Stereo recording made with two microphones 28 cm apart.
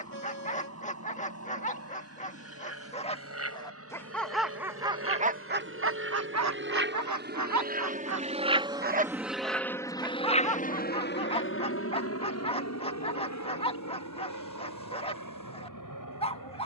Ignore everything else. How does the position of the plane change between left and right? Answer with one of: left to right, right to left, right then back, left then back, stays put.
right to left.